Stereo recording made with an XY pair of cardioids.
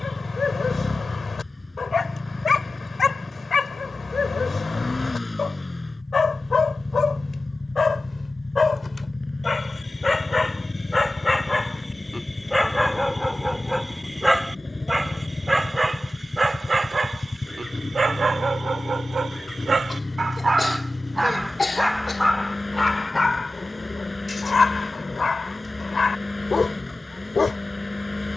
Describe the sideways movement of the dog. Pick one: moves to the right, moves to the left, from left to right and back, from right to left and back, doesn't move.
from left to right and back.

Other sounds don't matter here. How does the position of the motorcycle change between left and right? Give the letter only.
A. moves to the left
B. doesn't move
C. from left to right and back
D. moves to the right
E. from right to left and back
B.